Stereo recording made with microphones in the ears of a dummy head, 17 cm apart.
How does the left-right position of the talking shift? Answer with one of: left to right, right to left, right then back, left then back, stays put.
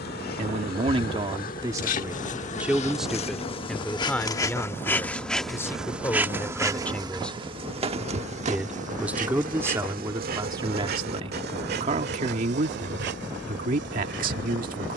left then back.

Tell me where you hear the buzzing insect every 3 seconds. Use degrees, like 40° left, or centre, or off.
50° left, 20° left, 30° right, 50° right, 70° right.